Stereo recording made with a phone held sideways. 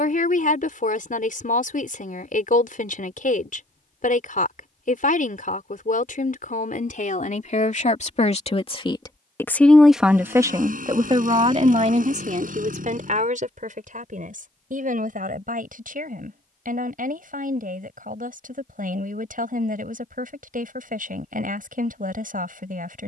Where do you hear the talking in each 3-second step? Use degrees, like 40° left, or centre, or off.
70° left, 70° left, 60° left, 20° right, 60° right, 70° right, 70° right, 70° right.